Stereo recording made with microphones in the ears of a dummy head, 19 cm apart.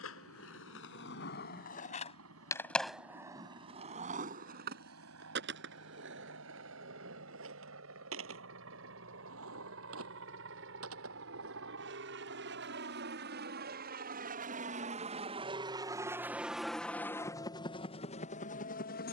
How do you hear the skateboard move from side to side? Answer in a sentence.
In this clip you hear the skateboard move to the right.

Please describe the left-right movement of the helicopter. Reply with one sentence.
In this clip you hear the helicopter go from the right side to the left.